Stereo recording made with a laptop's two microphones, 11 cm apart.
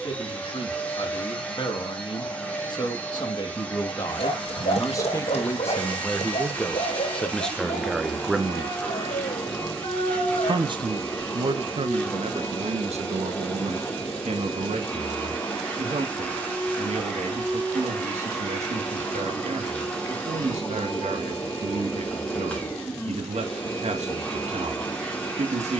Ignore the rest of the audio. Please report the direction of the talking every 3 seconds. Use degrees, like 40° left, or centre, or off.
40° left, 30° left, 10° left, 50° right, 70° right, 80° right, 80° right, 80° right, 80° right.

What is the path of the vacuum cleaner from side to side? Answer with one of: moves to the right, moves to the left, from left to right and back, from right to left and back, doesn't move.
doesn't move.